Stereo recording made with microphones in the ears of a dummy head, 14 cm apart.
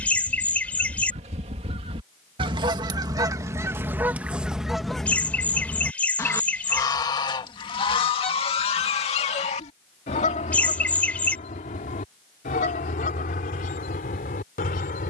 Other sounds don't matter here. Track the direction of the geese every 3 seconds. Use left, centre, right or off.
right, centre, left, left, left.